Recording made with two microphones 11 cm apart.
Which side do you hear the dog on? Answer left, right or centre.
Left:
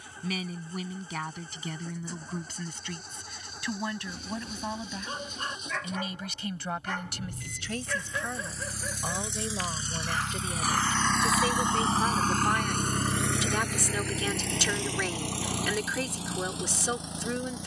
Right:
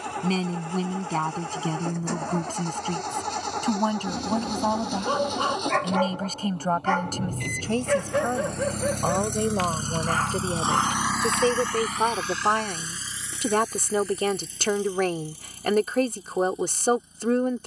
right.